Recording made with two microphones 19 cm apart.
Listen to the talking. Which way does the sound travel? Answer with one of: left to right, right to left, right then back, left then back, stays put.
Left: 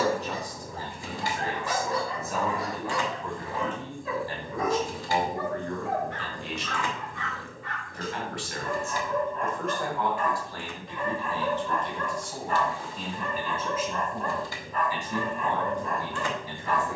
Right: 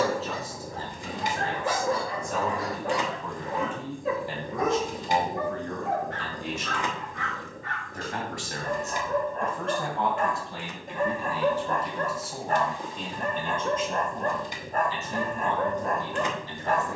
right then back.